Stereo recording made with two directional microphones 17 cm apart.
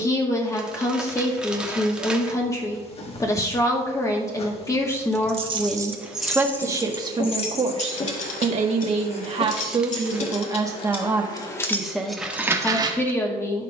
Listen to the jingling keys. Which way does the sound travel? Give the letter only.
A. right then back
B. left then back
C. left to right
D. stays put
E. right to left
B.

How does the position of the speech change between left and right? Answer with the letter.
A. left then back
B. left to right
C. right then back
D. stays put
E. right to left
C.